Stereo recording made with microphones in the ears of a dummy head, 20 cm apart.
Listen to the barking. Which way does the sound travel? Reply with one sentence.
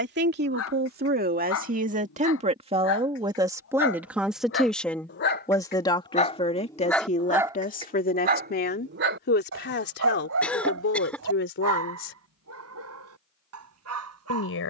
You can hear the barking go from the left side to the right.